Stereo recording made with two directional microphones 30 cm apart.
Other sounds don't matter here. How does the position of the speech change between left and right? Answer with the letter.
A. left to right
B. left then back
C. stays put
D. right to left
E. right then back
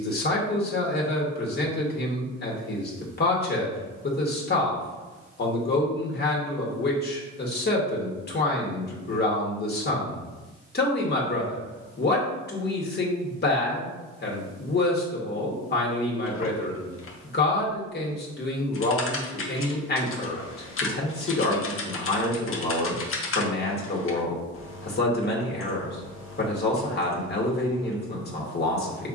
C.